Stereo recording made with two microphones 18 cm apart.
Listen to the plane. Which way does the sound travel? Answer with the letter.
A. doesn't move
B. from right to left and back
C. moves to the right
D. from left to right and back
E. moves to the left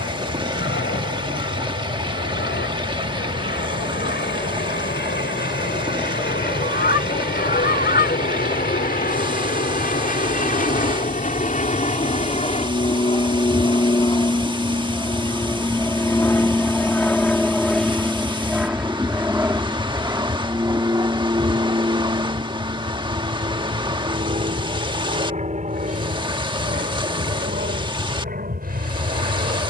C.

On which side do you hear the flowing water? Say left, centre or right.
right.